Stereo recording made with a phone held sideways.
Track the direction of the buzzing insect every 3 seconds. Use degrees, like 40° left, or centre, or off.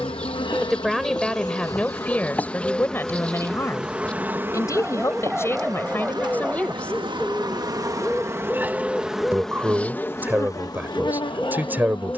20° left, 20° right, 30° right, 20° left.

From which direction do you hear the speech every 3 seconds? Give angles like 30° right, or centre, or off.
10° left, 20° left, 10° left, 10° right.